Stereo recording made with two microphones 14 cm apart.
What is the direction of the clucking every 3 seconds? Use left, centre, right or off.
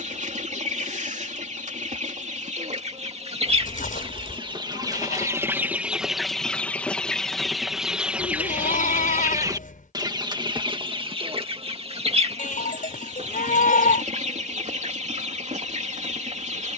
right, right, centre, right, right, right.